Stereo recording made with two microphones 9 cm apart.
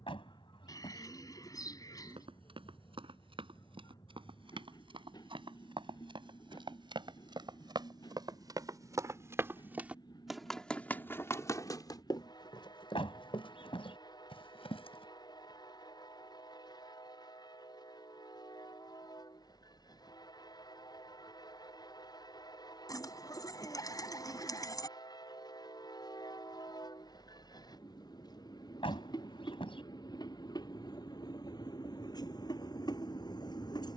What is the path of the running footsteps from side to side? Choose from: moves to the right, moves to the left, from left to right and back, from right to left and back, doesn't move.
moves to the left.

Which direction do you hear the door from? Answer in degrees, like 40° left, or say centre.
70° left.